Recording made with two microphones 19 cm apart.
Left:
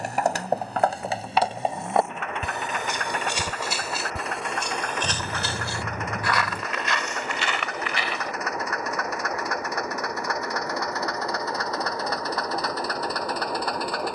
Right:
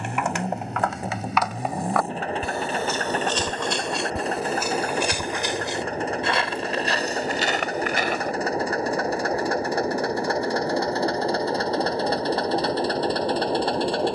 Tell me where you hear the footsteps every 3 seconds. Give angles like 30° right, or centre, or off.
30° left, centre, 40° right, off, off.